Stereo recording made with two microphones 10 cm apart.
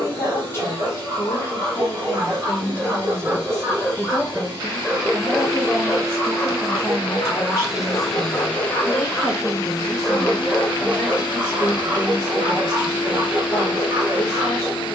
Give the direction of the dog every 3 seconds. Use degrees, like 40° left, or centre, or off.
30° right, centre, 30° left, 10° right, 30° right.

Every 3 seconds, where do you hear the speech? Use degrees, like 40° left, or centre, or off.
20° left, centre, 30° right, 10° left, 30° left.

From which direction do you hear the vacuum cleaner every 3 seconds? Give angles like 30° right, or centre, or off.
40° right, 40° right, 10° right, 50° left, 50° left.